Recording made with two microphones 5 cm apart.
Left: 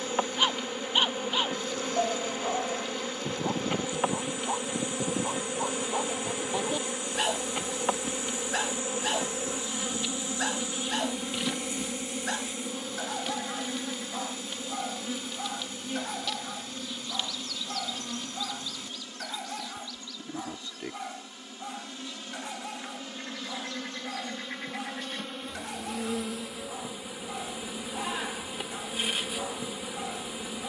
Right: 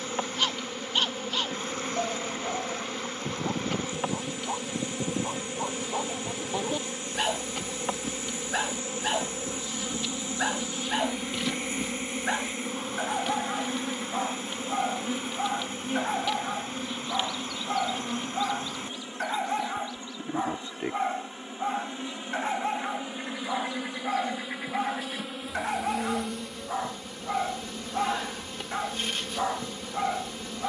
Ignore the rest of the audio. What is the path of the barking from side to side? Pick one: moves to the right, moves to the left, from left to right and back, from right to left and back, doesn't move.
moves to the right.